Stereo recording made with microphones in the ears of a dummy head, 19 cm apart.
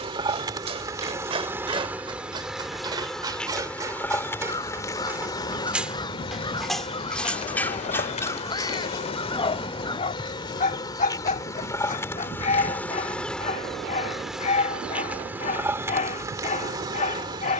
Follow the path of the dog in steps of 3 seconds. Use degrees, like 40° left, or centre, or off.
20° right, 10° right, 10° left, 30° left, 30° left, 30° left.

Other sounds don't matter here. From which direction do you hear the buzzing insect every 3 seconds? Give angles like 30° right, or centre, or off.
10° right, 10° left, 30° left, 20° left, centre, 10° right.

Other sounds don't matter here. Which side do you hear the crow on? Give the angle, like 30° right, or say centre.
20° left.